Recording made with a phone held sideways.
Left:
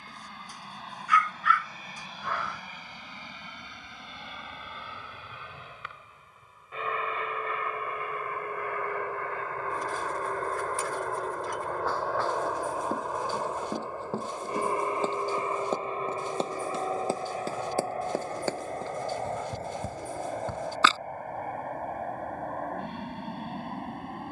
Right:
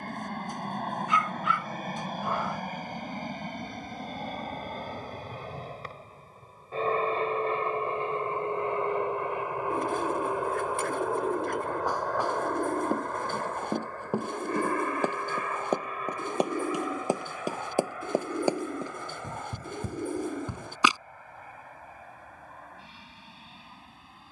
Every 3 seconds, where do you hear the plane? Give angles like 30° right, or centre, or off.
60° right, 50° right, 30° right, 10° right, 10° left, 30° left, 40° left, 50° left.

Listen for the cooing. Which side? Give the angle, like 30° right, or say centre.
60° right.